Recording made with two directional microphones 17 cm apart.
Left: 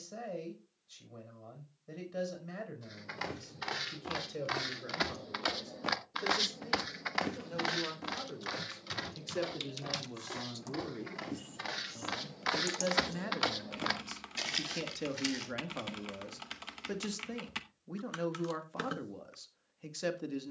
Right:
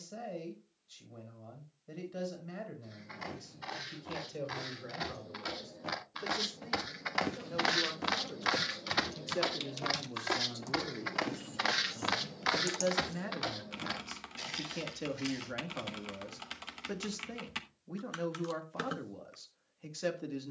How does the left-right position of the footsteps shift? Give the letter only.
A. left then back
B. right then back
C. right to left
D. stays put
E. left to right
B.